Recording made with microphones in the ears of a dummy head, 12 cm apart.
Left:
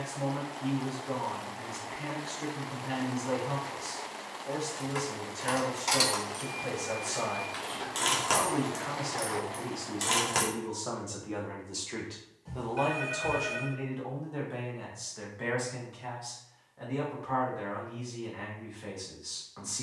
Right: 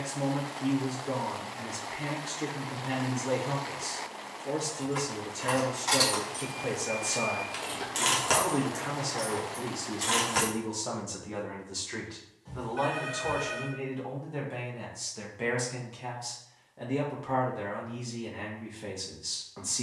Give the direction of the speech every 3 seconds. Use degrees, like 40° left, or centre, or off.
30° right, 30° right, 30° right, 10° right, 10° left, 20° right, 30° right.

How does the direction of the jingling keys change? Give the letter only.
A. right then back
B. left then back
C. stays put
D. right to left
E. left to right
A.